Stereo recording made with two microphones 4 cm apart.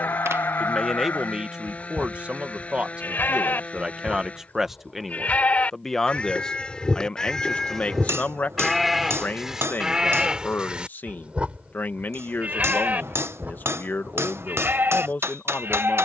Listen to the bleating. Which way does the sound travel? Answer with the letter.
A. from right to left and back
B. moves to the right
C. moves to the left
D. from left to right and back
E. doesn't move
B.